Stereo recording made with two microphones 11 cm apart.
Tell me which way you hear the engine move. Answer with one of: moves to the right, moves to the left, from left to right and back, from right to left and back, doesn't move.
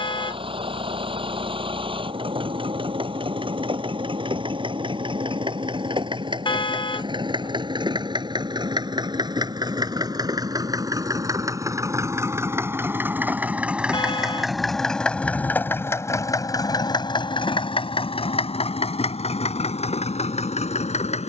moves to the left.